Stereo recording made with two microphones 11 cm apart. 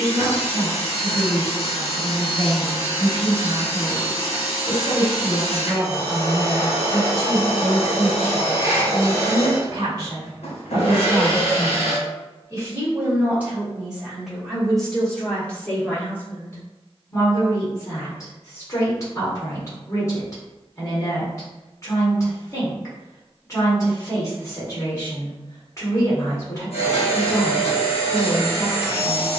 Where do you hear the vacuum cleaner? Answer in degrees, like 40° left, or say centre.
80° left.